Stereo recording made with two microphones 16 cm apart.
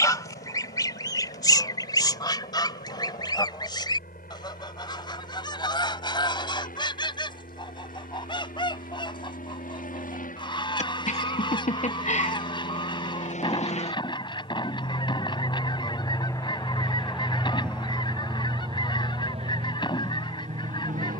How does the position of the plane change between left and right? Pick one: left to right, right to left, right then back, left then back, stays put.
left to right.